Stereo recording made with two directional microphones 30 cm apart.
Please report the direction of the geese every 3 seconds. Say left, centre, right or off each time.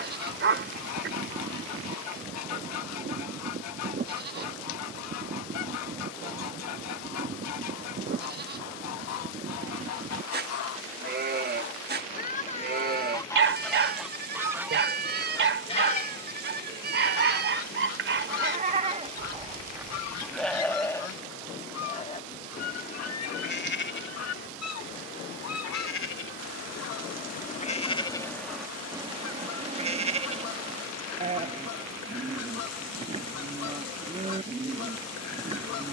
left, left, left, left, centre, left, left, left, left, left, left, left.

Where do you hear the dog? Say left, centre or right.
right.